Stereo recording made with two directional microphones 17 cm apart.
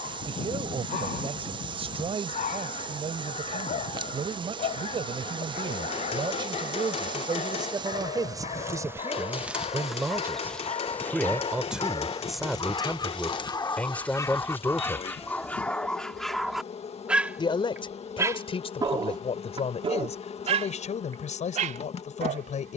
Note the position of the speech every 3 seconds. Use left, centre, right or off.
right, right, right, centre, centre, left, left, left.